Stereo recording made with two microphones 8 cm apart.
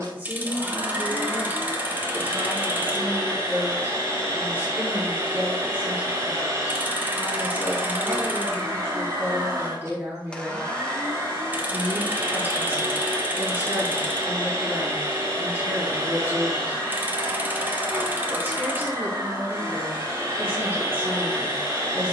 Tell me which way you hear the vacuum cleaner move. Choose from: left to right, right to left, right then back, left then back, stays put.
stays put.